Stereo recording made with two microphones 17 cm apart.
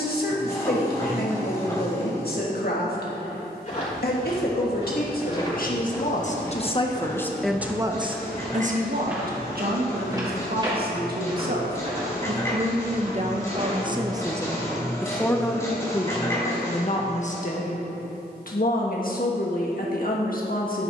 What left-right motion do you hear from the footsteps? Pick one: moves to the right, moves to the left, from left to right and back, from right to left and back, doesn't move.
moves to the right.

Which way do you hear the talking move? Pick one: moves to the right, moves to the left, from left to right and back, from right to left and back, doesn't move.
from left to right and back.